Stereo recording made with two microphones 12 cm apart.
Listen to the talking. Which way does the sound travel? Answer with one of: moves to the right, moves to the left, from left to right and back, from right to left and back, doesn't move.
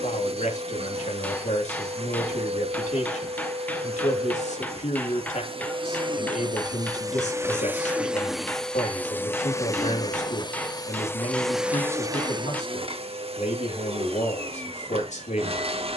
doesn't move.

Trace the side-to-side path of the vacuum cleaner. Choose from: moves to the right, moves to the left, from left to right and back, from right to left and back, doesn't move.
from right to left and back.